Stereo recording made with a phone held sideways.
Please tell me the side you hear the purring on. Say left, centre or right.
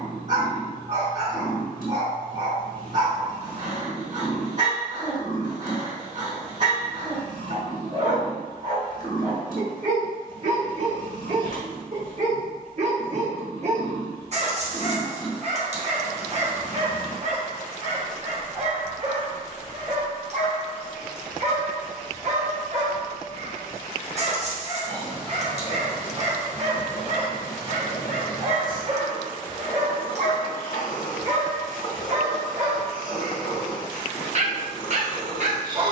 left.